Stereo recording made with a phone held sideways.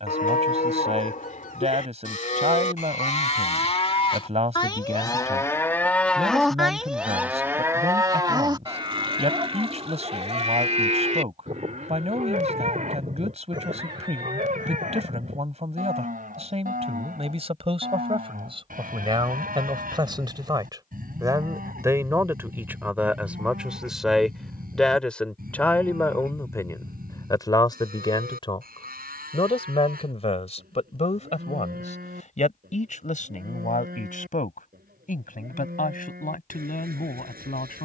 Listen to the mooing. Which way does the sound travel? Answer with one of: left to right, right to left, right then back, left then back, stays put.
left to right.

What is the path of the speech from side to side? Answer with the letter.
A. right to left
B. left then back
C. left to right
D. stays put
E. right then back
A.